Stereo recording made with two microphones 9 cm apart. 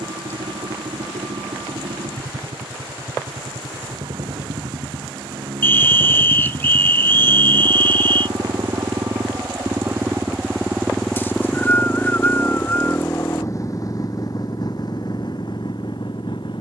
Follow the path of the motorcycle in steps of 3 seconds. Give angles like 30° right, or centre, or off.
80° right, 70° right, 50° right, 10° right, 30° left, 50° left.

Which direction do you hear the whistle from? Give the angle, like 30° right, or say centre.
20° left.